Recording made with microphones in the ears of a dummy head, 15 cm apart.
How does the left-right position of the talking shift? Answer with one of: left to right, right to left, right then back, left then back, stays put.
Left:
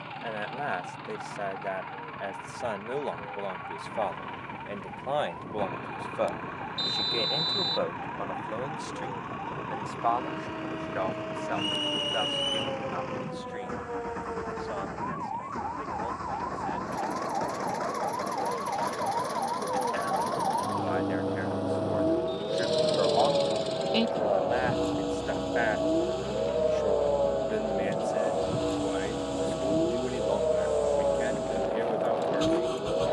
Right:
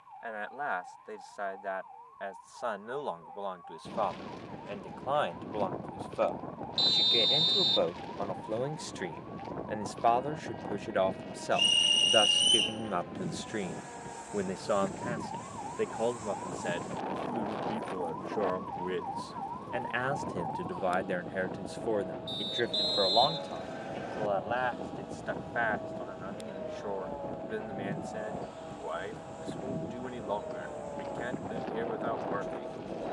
right then back.